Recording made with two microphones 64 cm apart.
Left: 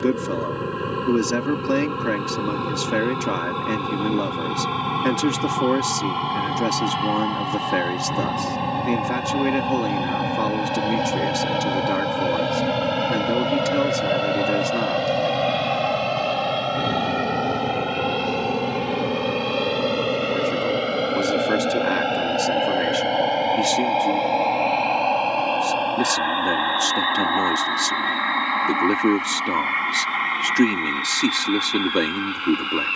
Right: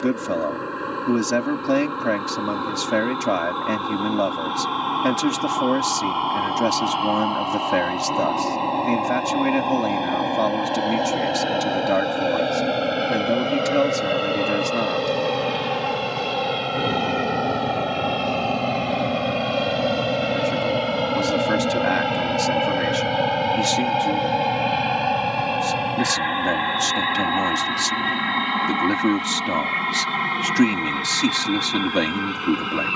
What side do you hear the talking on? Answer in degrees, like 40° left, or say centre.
10° right.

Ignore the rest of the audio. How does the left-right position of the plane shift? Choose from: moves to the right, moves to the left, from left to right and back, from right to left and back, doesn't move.
moves to the right.